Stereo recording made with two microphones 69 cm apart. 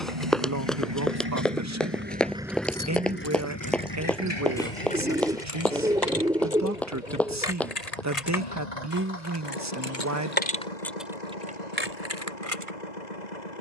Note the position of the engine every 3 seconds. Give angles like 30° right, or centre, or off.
20° right, 40° left, 70° left, 70° left, 80° left.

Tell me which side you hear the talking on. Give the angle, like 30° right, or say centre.
20° right.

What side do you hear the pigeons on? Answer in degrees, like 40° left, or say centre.
10° right.